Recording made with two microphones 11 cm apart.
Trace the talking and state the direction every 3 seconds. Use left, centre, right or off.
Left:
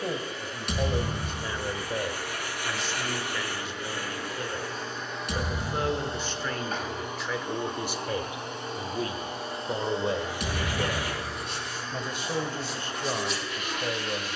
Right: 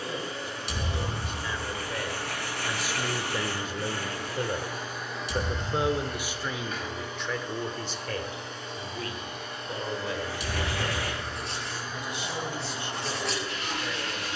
left, right, centre, left, left.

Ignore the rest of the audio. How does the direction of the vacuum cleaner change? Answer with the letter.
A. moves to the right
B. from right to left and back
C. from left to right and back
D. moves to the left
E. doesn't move
B.